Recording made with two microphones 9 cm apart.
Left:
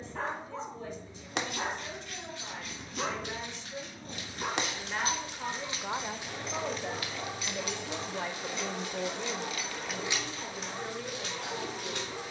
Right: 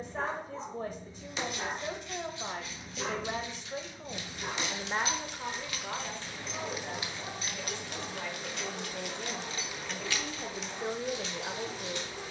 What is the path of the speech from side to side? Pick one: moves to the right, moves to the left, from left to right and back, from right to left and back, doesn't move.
from right to left and back.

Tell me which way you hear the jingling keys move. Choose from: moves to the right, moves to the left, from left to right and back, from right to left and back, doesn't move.
from left to right and back.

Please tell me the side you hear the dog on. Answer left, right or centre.
left.